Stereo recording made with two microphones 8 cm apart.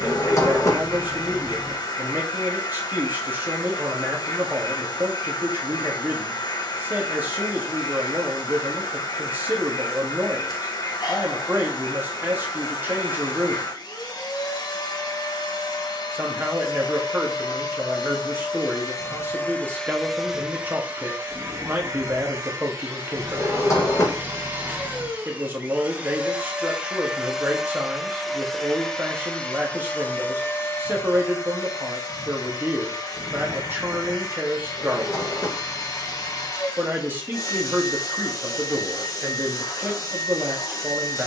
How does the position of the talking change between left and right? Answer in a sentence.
You can hear the talking stay put.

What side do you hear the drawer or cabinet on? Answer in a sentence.
You can hear the drawer or cabinet on the left.